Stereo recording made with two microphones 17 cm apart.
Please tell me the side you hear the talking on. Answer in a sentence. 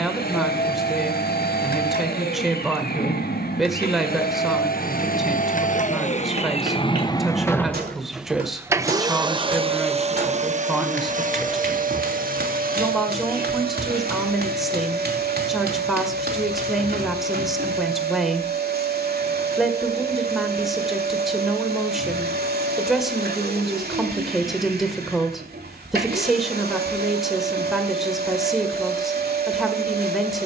You can hear the talking in the centre.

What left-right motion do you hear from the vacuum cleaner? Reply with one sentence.
In this clip you hear the vacuum cleaner go from the left side to the right.